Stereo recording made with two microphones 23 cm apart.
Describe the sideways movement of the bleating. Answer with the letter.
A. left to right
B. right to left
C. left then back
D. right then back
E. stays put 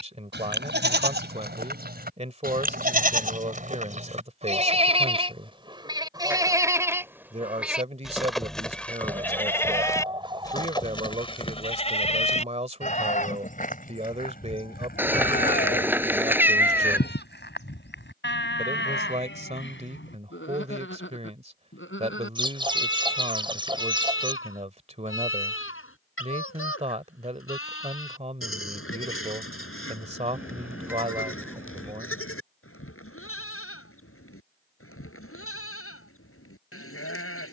B.